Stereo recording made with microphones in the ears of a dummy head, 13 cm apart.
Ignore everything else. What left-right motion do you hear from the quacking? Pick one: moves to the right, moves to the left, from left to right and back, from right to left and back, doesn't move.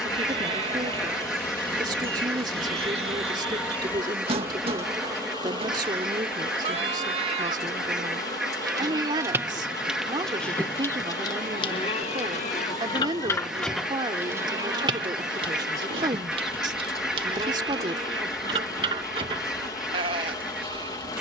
doesn't move.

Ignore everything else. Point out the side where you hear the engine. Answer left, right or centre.
left.